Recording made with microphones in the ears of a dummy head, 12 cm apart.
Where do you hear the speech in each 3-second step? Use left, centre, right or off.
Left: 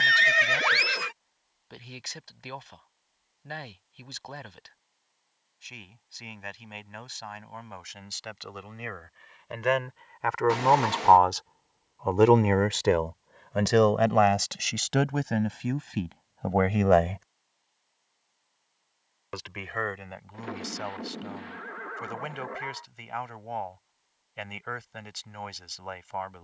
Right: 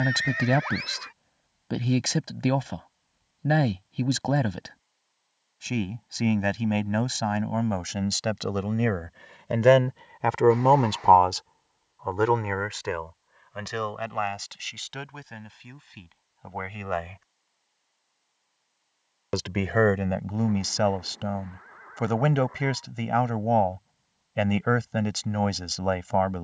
right, right, right, right, left, left, right, right, right.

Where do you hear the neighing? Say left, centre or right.
left.